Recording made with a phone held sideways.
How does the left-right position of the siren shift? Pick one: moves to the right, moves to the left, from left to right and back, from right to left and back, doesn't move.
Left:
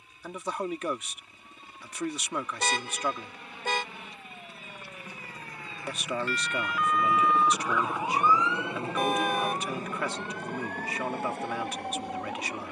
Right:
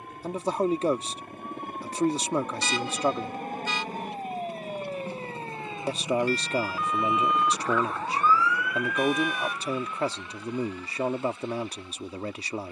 moves to the left.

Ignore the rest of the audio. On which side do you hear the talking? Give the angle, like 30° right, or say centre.
30° right.